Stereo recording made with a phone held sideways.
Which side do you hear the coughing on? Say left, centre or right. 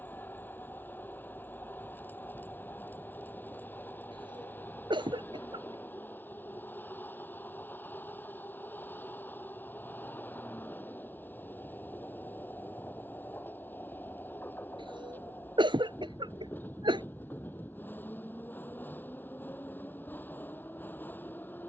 right.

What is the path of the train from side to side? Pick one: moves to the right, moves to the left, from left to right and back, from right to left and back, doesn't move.
doesn't move.